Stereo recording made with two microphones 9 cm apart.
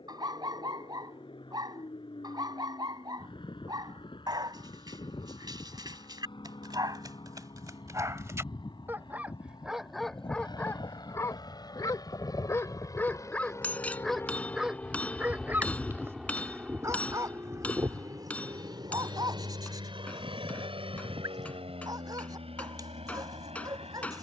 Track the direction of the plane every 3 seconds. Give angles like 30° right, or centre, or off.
70° left, 70° left, 60° left, 50° left, 30° left, 10° right, 50° right, 70° right.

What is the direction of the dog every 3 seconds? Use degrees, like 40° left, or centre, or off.
50° right, 50° right, 40° right, 10° left, 10° left, 30° right, 40° right, 40° right.